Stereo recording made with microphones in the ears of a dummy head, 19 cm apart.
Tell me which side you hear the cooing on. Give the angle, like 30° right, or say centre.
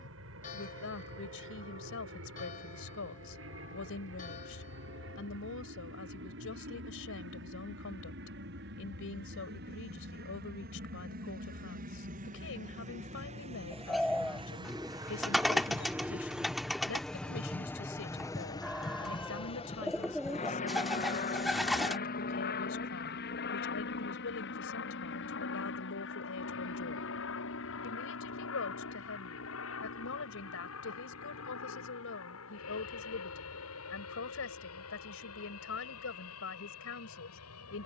centre.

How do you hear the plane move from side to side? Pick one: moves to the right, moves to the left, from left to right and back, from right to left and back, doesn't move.
moves to the left.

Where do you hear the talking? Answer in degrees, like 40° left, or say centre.
80° left.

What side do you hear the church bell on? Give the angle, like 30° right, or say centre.
40° left.